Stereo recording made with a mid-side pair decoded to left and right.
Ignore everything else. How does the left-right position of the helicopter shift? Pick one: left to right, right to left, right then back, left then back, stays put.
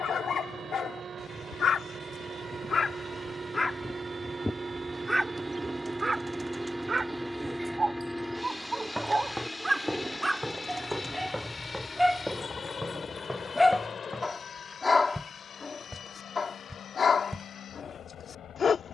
right to left.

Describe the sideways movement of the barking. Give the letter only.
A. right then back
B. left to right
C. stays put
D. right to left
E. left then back
A.